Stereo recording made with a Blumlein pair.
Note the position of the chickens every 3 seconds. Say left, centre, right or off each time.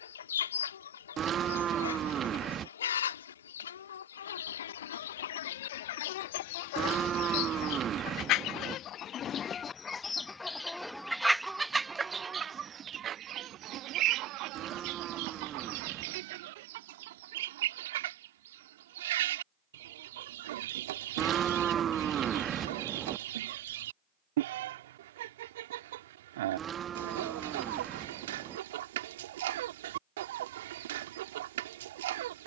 left, left, left, centre, right, right, right, right, right, right, right.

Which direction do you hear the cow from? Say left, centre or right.
right.